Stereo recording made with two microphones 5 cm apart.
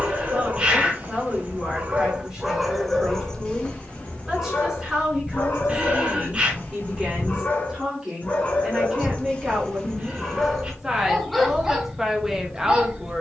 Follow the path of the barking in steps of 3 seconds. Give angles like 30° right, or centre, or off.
30° right, 30° left, 40° left, 10° left, 20° right.